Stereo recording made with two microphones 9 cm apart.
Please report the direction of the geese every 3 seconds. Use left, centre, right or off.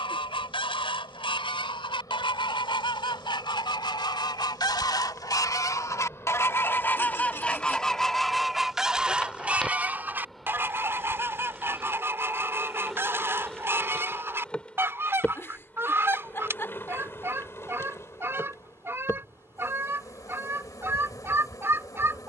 left, left, centre, right, right, right, right, right.